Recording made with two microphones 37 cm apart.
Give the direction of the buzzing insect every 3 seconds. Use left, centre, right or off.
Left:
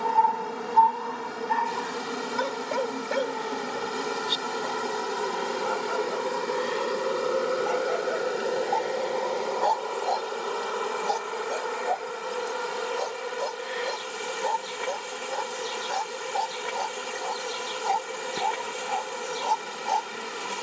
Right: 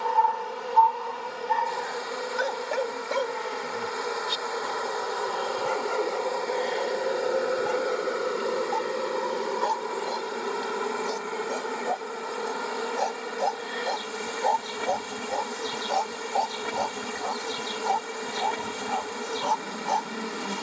left, left, centre, right, right, right, right.